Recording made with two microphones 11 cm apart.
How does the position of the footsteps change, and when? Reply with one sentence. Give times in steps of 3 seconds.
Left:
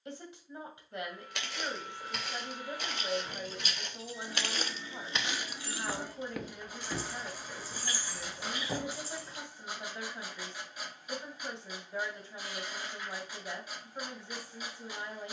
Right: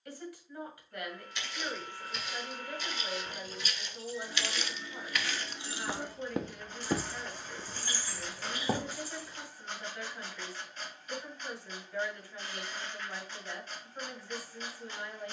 You can hear the footsteps on the left from 0 s, on the right from 6 s and not at all from 9 s.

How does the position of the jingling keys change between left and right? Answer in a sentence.
You can hear the jingling keys move to the left.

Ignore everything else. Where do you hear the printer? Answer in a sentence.
You can hear the printer in the centre.